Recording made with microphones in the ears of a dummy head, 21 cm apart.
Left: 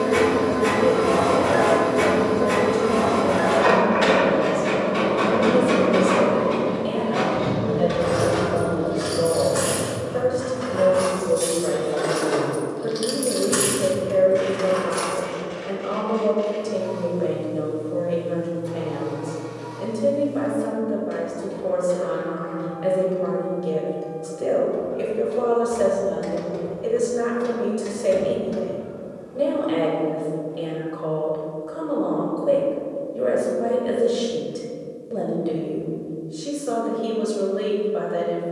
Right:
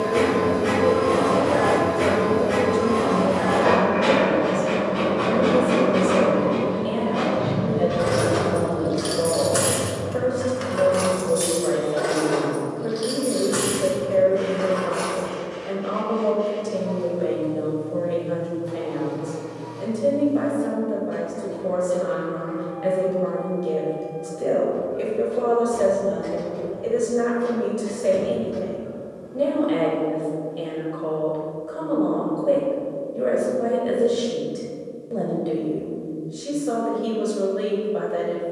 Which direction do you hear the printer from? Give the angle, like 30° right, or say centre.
70° left.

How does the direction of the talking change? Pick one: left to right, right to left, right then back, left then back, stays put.
stays put.